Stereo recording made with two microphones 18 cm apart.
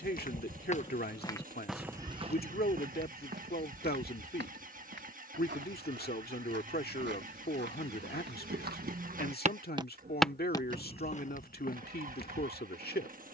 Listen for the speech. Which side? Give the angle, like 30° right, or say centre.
60° left.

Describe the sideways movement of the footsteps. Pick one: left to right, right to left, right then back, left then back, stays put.
right then back.